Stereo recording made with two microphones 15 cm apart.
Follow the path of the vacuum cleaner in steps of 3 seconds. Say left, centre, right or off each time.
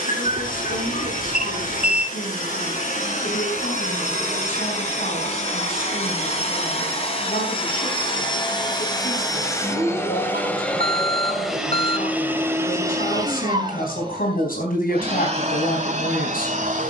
left, left, left, centre, right, right.